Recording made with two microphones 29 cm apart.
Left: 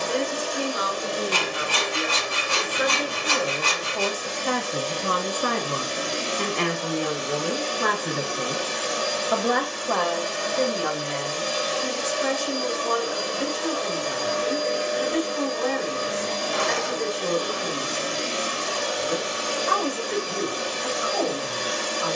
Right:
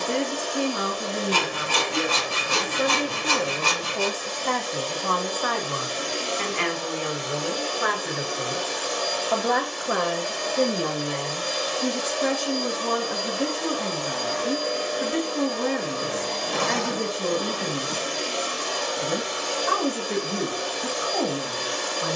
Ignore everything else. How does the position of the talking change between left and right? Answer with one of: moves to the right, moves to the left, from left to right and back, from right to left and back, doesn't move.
from right to left and back.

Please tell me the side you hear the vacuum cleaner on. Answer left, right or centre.
left.